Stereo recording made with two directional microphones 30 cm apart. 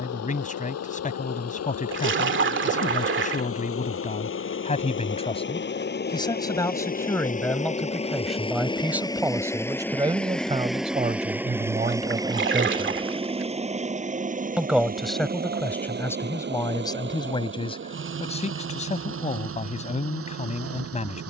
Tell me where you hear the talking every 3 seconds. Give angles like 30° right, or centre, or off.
30° left, 20° left, 10° left, 20° right, 10° right, 10° left, 20° left.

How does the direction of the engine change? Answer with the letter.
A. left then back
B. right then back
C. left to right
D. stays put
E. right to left
C.